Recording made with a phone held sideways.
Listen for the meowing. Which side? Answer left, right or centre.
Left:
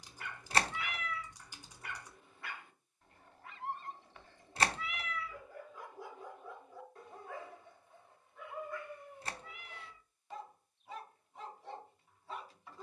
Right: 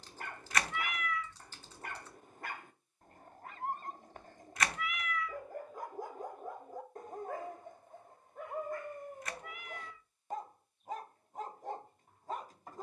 left.